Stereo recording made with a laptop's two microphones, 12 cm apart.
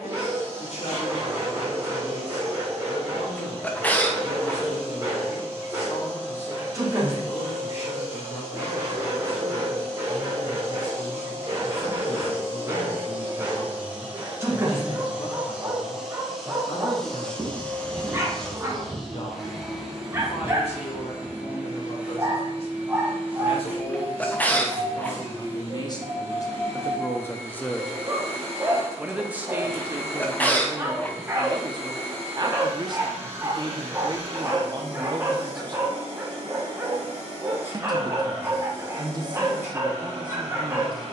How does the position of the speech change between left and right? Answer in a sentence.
You can hear the speech travel towards the right.